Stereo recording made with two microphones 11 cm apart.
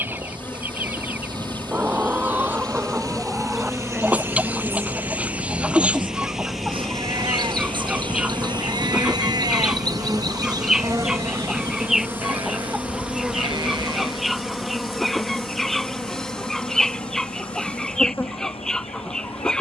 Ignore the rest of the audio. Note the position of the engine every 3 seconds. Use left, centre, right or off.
right, right, centre, left, left, left, left.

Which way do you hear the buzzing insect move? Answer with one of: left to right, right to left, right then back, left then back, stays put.
right then back.